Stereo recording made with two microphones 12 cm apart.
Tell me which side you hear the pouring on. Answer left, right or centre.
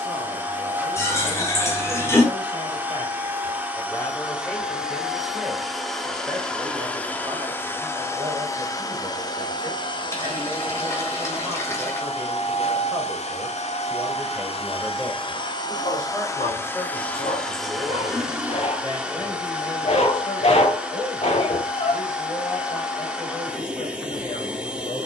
left.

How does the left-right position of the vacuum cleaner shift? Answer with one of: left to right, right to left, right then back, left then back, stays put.
left then back.